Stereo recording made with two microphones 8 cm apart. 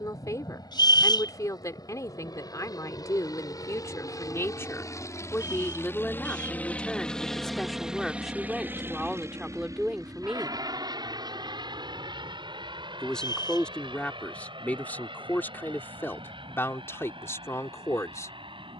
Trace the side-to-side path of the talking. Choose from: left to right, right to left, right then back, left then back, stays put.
right then back.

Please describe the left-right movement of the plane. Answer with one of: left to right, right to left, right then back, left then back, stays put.
left to right.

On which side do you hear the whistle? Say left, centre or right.
left.